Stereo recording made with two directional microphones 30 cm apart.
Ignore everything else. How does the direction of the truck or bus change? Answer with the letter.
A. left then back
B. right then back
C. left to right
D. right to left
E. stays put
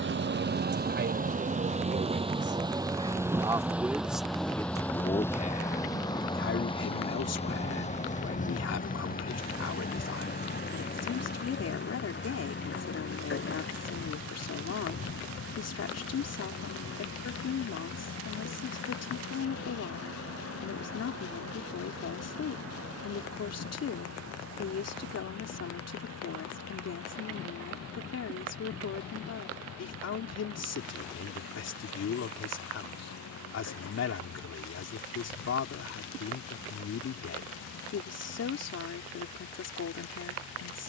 D.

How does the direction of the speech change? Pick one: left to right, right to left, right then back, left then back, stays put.
right to left.